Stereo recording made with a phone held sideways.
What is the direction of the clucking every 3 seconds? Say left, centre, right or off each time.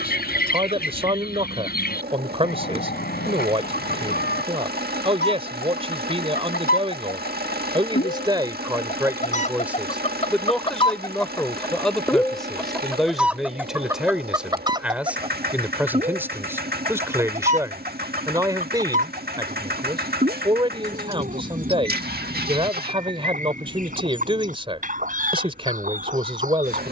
left, left, left, left, centre, right, right, right, right.